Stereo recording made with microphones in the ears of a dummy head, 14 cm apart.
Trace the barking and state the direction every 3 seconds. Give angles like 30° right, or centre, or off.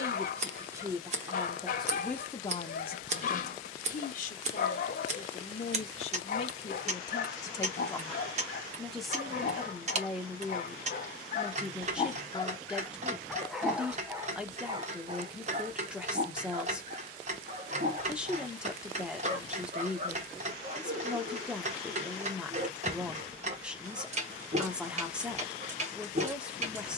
50° left, 50° left, 50° left, 50° left, centre, 40° right, 50° right, 50° right, 50° right.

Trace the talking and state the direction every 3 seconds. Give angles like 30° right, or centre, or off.
centre, 50° left, 20° left, 10° right, 10° right, 10° right, 10° right, 10° right, 10° right.